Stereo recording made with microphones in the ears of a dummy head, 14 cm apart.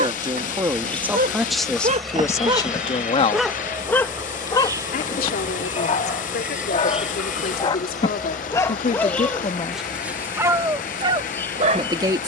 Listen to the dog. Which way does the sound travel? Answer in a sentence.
You can hear the dog move from right to left and back again.